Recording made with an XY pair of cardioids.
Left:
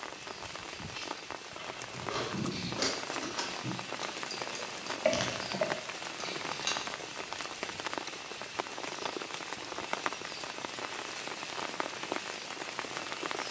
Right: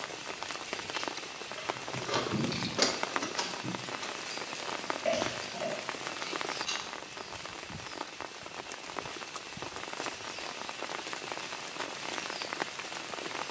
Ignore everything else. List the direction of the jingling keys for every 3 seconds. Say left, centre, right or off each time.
right, left, left, off, off.